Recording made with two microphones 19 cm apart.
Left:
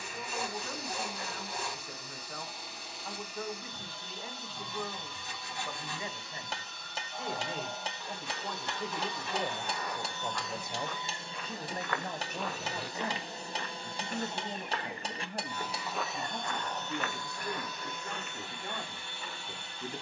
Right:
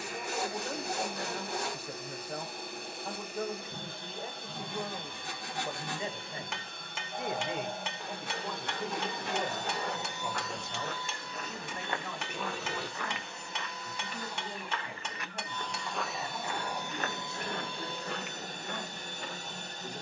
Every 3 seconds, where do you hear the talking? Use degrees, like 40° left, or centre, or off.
40° right, 40° right, 10° right, 20° left, 40° left, 60° left, 60° left.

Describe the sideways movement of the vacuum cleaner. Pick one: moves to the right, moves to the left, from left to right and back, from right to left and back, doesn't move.
from right to left and back.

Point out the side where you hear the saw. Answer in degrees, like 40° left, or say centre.
70° right.